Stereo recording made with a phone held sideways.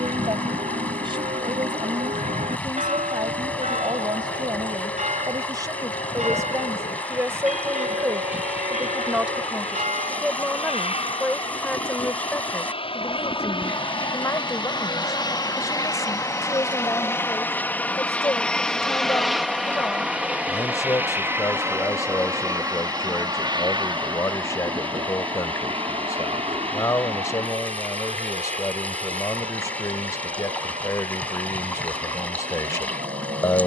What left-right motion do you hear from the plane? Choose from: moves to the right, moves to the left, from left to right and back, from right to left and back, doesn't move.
moves to the right.